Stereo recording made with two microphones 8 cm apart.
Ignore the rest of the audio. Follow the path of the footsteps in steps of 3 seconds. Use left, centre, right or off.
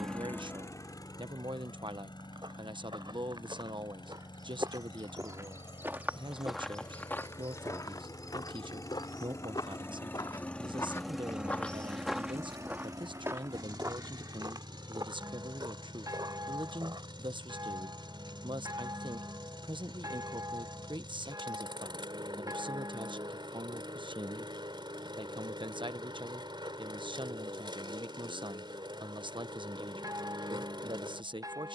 right, right, left, left, right, right, off, off, off, off, off.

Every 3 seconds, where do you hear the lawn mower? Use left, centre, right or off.
left, left, left, centre, right, right, right, right, right, right, right.